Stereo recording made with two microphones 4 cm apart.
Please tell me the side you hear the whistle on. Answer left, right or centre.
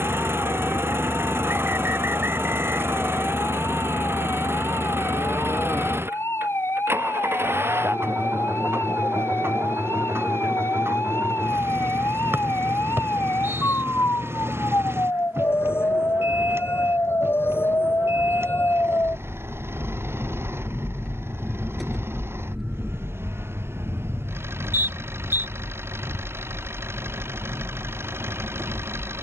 right.